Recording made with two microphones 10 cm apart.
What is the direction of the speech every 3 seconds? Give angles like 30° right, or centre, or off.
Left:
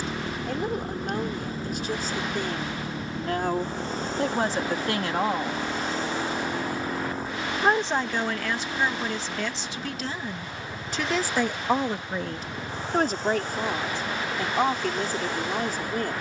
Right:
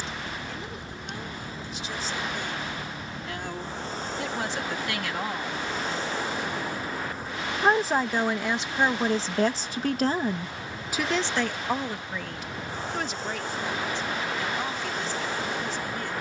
50° left, 40° left, 10° right, 20° right, 50° left, 50° left.